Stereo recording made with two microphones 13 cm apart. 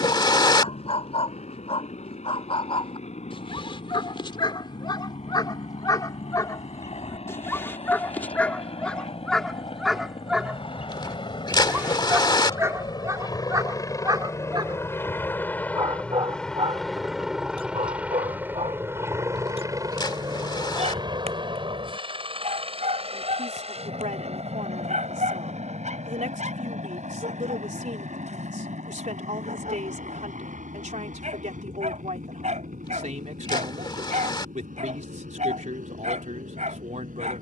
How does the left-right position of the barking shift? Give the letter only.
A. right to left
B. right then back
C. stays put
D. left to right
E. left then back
D.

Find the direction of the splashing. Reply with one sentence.
You can hear the splashing on the left.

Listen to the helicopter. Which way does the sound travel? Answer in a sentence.
You can hear the helicopter travel towards the right.